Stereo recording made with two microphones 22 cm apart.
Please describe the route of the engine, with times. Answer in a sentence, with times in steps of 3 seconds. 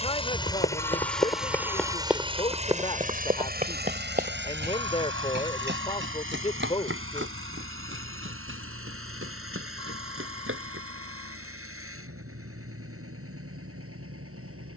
You can hear the engine in the centre from 0 s and on the right from 3 s.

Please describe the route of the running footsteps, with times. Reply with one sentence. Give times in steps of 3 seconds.
In this clip you hear the running footsteps in the centre from 0 s, on the right from 3 s and not at all from 12 s.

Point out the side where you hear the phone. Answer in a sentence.
In this clip you hear the phone on the left.